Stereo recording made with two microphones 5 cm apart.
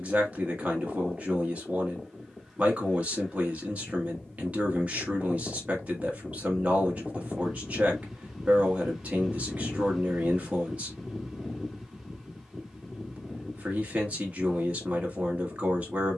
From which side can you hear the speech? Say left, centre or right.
right.